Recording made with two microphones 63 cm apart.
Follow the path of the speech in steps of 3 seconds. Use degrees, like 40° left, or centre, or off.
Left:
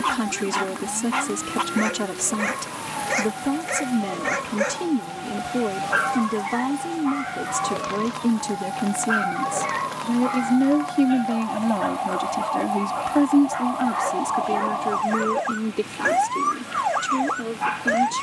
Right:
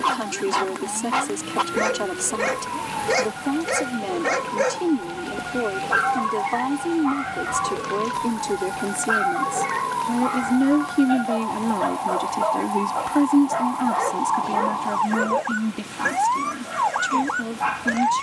50° left, 50° left, 50° left, 20° left, centre, 20° right.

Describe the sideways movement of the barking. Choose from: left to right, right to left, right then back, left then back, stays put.
stays put.